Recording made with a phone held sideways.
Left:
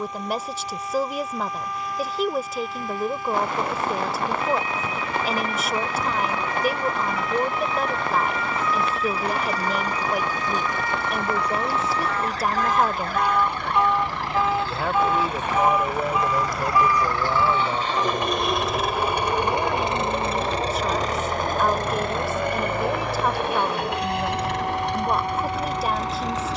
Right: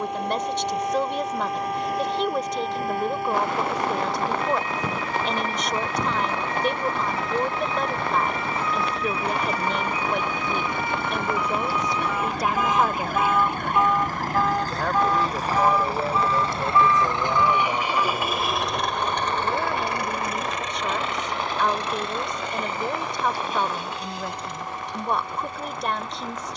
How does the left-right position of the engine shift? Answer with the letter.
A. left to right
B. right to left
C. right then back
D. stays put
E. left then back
B.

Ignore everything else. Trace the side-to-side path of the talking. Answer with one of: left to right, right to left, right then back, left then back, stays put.
stays put.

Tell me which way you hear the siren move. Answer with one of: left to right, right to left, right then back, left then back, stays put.
right to left.